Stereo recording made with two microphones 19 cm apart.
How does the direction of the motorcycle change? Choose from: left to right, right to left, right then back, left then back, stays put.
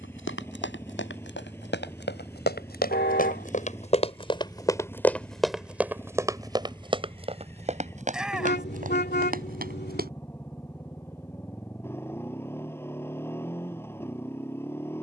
stays put.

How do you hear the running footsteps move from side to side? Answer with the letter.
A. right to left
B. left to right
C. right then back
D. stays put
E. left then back
B.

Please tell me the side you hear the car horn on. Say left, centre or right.
left.